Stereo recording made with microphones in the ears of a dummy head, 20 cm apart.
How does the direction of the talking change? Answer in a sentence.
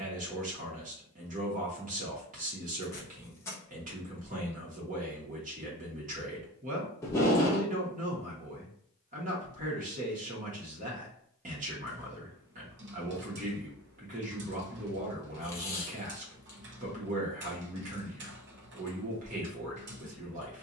In this clip you hear the talking stay put.